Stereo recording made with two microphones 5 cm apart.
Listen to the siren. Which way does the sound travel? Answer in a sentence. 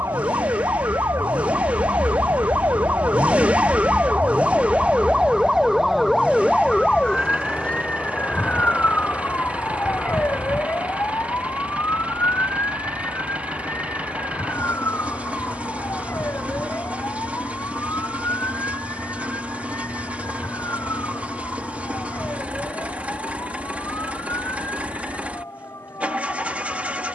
In this clip you hear the siren go from the right side to the left.